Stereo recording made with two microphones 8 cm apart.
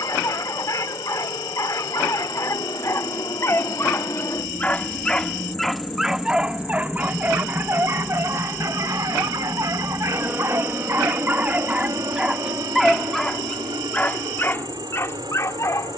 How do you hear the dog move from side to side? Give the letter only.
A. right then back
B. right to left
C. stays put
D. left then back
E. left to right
A.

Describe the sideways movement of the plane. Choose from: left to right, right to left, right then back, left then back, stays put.
left to right.